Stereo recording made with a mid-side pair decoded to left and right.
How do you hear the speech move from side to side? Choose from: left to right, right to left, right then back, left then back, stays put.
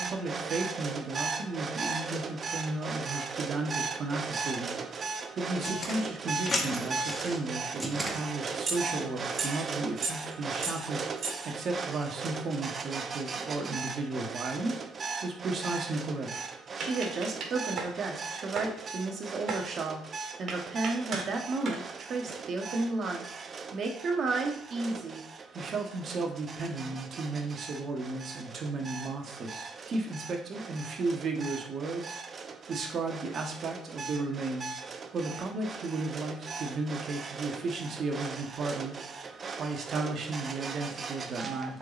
stays put.